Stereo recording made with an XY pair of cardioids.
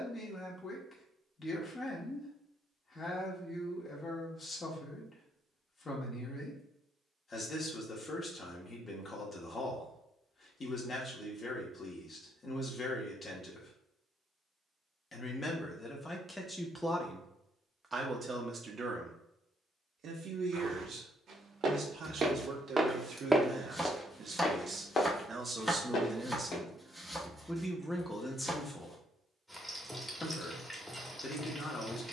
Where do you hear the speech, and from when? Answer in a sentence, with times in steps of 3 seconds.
You can hear the speech on the left from 0 s, in the centre from 15 s, on the right from 18 s, in the centre from 27 s and on the left from 30 s.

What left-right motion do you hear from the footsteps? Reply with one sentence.
In this clip you hear the footsteps go from the right side to the left.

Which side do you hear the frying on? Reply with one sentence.
In this clip you hear the frying in the centre.